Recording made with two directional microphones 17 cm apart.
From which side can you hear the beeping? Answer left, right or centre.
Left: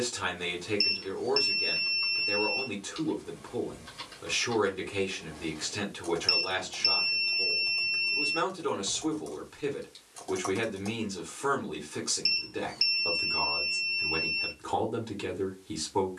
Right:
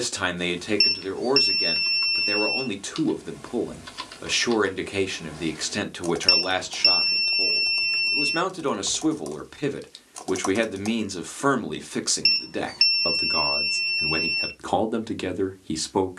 right.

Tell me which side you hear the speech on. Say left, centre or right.
right.